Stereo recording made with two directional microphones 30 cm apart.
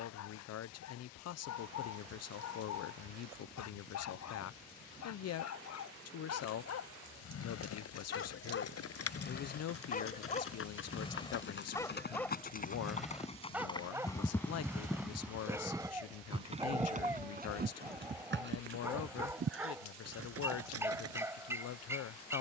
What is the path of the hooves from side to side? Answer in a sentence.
You can hear the hooves move to the right.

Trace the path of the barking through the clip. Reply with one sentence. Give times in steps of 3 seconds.
You can hear the barking on the left from 0 s and in the centre from 12 s.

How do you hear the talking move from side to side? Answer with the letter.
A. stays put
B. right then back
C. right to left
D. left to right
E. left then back
A.